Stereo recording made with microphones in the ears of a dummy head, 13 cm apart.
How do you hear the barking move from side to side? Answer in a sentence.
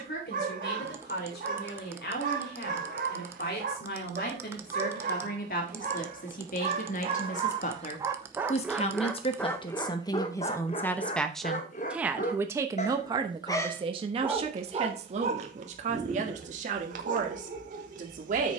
You can hear the barking move from right to left and back again.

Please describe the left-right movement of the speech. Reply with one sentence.
You can hear the speech go from the left side to the right.